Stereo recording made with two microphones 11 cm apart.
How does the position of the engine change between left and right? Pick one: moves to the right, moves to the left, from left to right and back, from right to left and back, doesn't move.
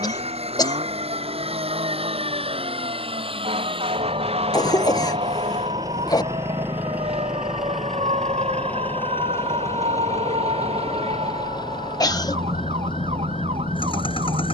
moves to the left.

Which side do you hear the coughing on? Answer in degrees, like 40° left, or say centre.
40° left.